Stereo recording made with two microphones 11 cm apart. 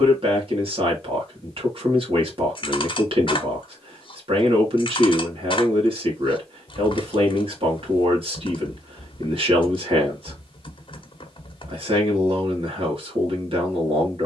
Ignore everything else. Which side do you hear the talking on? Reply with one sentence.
You can hear the talking on the right.